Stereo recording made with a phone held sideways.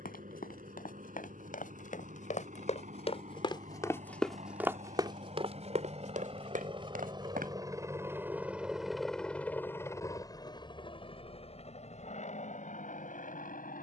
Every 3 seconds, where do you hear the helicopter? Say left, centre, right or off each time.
right, right, right, left, left.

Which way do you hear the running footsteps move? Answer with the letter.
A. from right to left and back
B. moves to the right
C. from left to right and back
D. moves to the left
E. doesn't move
B.